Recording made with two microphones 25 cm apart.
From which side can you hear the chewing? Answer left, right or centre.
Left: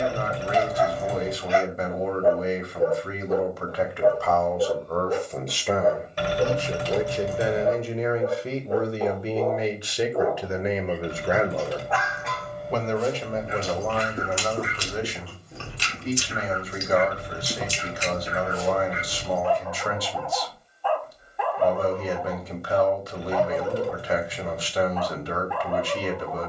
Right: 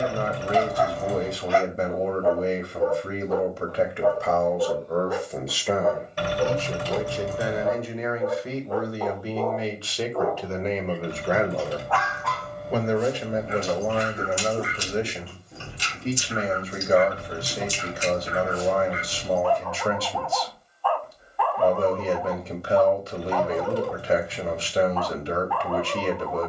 left.